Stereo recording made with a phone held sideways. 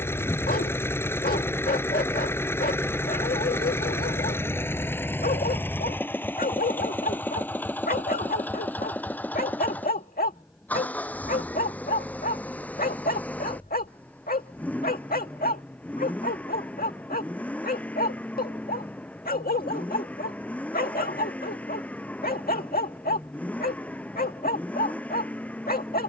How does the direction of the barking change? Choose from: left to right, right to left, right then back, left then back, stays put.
stays put.